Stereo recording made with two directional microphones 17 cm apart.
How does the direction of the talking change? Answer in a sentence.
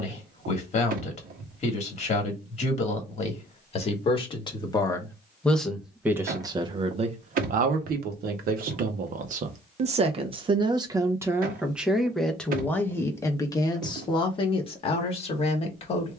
In this clip you hear the talking go right and come back.